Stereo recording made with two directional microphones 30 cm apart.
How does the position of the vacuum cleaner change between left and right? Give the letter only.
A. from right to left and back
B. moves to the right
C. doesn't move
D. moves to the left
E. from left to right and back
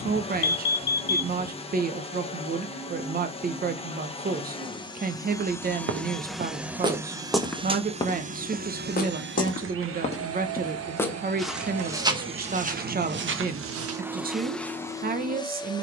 E.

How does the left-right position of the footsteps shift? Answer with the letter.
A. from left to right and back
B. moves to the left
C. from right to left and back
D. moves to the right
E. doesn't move
C.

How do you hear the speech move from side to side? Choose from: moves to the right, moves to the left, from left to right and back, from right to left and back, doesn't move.
doesn't move.